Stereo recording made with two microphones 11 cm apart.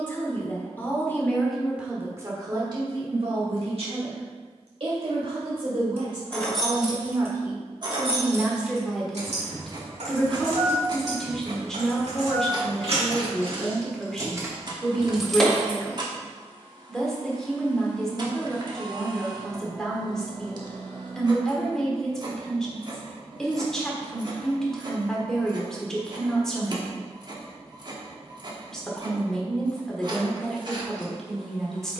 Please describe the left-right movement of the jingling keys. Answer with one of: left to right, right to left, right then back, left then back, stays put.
right then back.